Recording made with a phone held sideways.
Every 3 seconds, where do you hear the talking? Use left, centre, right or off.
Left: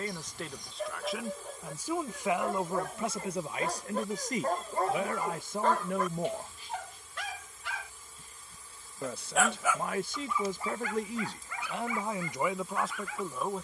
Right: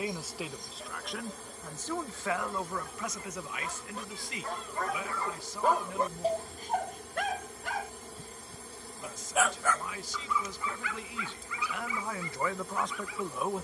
centre, left, left, left, centre.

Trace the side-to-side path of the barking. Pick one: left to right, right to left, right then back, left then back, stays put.
right then back.